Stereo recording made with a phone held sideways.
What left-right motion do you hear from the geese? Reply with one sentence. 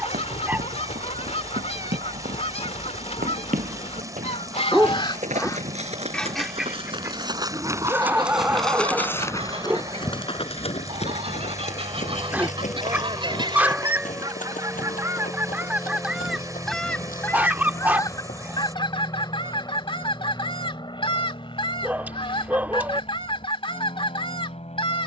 In this clip you hear the geese go right and come back.